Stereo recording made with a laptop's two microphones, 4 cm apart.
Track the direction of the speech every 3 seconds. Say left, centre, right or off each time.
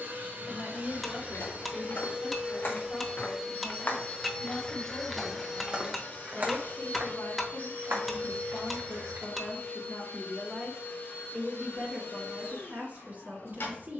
left, left, left, centre, right.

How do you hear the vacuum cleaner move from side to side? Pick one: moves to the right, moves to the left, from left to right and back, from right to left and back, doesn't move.
moves to the left.